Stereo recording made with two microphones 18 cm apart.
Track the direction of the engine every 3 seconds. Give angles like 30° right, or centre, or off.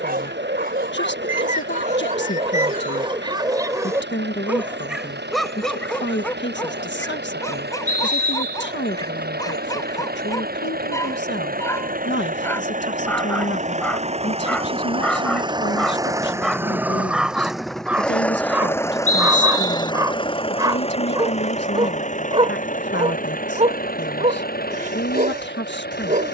80° right, 70° right, 70° right, 60° right, 40° right, 10° right, 20° left, 40° left, 50° left.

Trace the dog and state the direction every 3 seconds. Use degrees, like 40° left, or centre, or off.
50° right, 10° right, 20° left, 20° left, 10° left, centre, 20° right, 30° right, 40° right.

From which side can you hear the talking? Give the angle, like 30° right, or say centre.
80° left.